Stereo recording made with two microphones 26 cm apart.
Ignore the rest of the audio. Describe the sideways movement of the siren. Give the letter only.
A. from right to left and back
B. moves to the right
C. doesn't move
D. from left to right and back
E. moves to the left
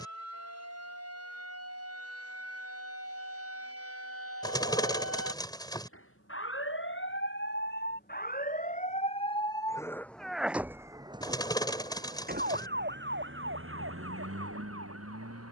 B.